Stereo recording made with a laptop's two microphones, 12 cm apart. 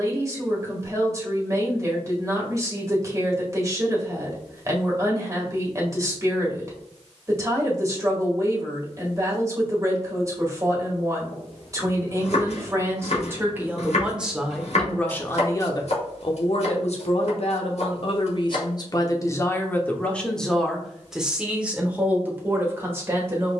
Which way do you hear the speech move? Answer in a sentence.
In this clip you hear the speech move from right to left and back again.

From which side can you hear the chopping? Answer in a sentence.
You can hear the chopping on the left.